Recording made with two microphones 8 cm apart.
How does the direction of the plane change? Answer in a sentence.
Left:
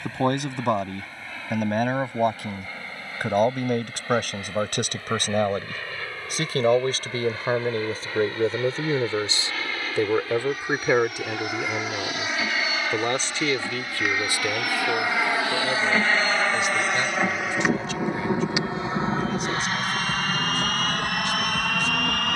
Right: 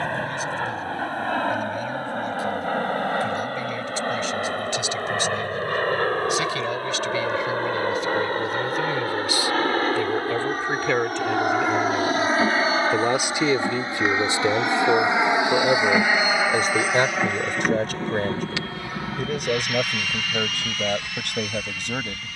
In this clip you hear the plane go from the right side to the left.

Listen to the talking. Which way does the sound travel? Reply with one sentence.
In this clip you hear the talking move from left to right.